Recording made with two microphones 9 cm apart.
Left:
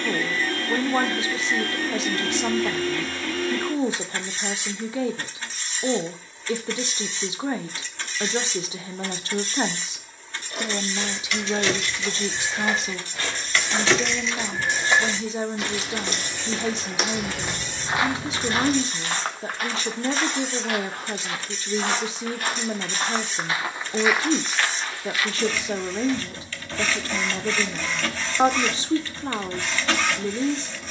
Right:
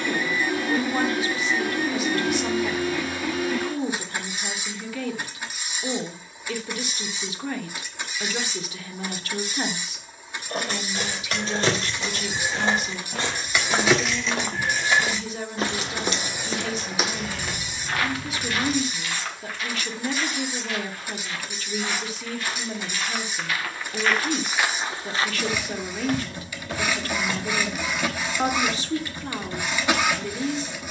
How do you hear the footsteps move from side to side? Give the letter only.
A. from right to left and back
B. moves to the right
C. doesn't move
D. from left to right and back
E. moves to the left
A.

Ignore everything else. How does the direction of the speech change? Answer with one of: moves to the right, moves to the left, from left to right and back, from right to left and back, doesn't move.
doesn't move.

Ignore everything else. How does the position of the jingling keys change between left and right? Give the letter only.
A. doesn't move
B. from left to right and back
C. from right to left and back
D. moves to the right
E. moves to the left
E.